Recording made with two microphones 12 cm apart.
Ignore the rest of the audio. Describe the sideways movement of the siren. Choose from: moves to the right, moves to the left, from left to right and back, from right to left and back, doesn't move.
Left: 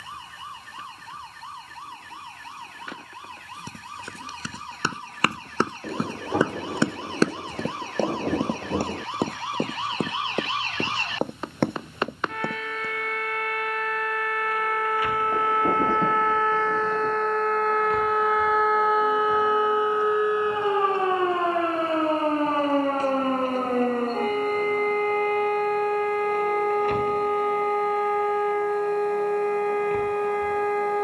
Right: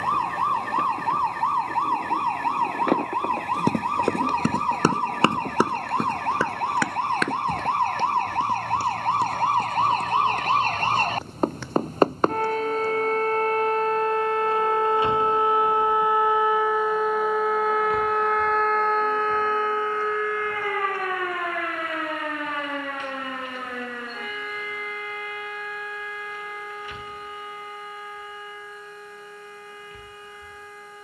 moves to the left.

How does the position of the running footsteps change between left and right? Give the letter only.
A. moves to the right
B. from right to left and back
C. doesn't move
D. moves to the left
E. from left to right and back
D.